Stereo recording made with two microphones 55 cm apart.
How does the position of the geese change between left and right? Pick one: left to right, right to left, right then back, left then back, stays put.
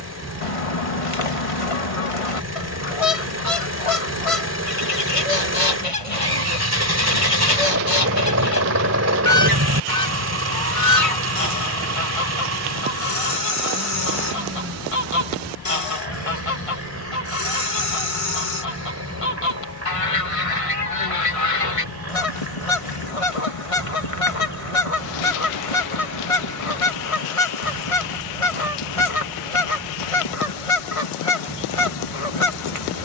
stays put.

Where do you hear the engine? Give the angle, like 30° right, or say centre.
30° right.